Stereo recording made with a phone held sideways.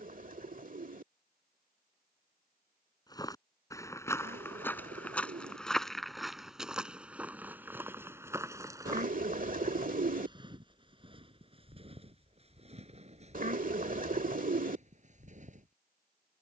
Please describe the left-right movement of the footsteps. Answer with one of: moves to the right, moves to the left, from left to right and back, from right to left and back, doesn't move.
moves to the right.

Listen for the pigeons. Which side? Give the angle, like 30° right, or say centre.
60° right.